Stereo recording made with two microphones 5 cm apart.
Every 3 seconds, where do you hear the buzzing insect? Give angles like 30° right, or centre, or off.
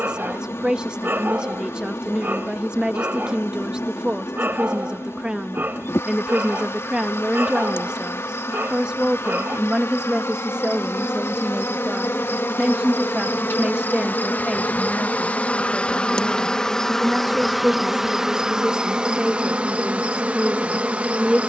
70° left, 70° left, 70° left, 70° left, 50° left, 10° left, 20° right.